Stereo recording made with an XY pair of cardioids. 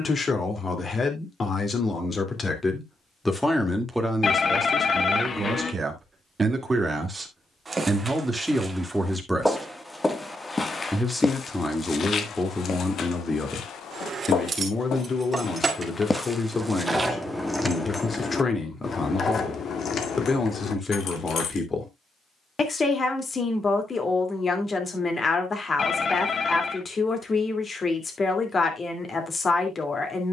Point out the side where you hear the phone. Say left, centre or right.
left.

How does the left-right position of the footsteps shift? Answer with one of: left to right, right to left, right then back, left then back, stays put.
left then back.